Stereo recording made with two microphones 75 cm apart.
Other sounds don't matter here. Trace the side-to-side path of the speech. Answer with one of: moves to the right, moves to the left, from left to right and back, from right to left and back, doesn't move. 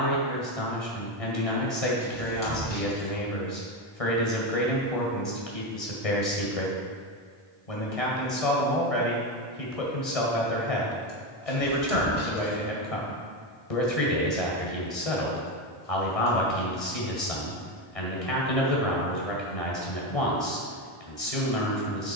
doesn't move.